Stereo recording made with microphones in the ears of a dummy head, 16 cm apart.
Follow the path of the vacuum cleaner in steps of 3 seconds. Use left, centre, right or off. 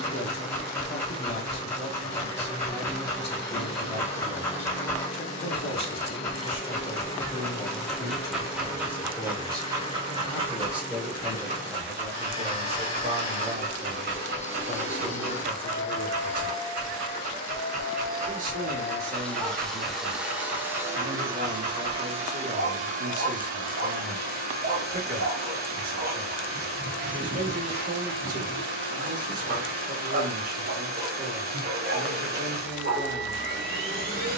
left, left, left, left, left, left, centre, right, right, right, right, right.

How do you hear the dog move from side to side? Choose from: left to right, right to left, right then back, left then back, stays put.
left to right.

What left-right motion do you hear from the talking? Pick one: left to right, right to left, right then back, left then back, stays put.
left to right.